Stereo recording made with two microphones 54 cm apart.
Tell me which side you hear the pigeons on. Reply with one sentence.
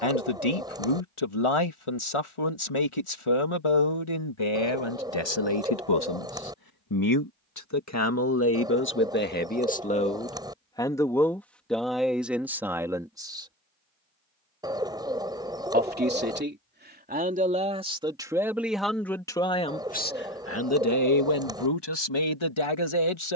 In this clip you hear the pigeons in the centre.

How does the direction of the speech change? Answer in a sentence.
You can hear the speech go right and come back.